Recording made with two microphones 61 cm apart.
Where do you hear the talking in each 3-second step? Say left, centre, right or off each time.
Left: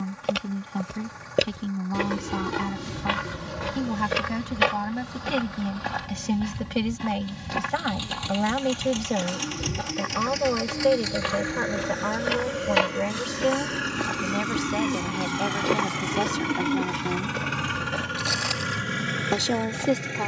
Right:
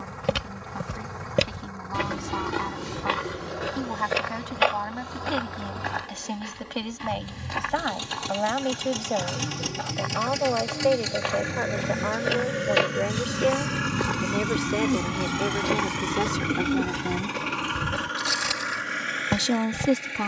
left, left, left, left, left, centre, right.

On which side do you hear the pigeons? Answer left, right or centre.
right.